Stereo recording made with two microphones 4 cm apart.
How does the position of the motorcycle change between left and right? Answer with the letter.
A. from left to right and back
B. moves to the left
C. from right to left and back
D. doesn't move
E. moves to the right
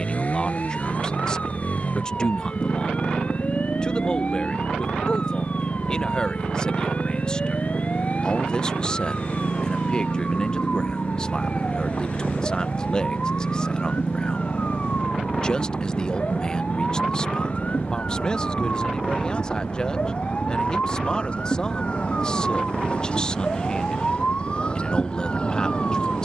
D.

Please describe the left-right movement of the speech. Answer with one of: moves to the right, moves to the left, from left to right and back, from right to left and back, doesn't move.
doesn't move.